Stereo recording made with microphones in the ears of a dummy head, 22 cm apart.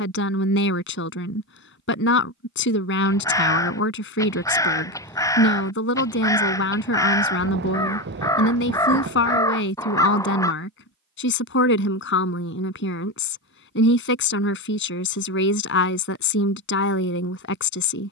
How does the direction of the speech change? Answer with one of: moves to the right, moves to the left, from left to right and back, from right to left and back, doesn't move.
doesn't move.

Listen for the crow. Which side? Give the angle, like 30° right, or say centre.
10° left.